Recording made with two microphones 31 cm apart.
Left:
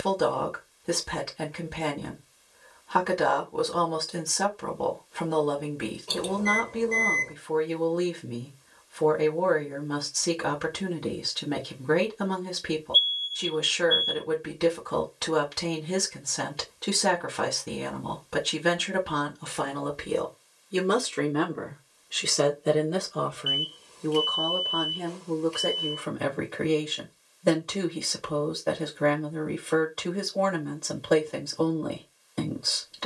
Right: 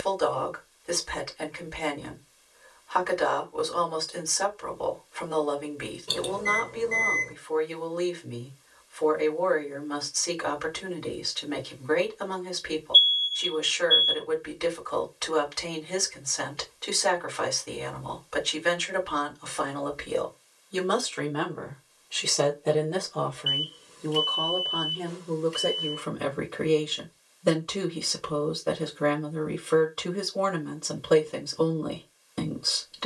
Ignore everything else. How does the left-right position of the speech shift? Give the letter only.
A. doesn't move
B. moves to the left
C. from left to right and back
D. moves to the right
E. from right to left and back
D.